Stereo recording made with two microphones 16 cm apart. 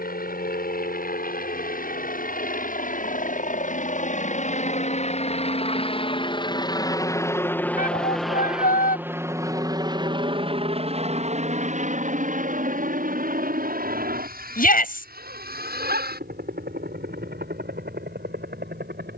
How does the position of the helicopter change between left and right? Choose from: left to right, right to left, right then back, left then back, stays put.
left to right.